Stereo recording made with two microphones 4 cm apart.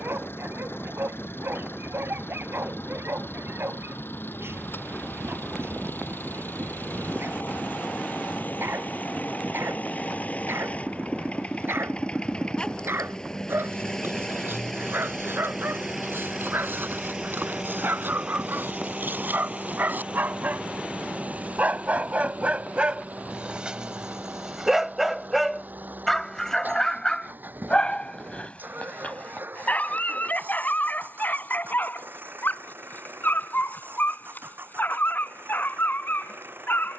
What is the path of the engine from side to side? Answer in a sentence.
You can hear the engine move from left to right.